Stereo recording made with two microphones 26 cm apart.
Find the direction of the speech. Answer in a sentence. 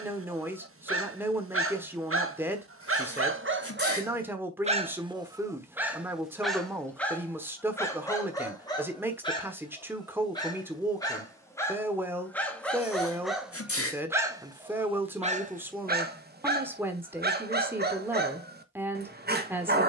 You can hear the speech in the centre.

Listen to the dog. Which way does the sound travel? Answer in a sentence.
In this clip you hear the dog move from right to left and back again.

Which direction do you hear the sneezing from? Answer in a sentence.
You can hear the sneezing on the left.